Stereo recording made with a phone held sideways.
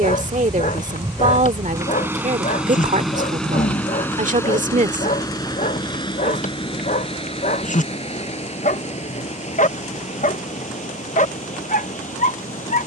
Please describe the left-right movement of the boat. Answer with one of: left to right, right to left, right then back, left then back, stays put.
right to left.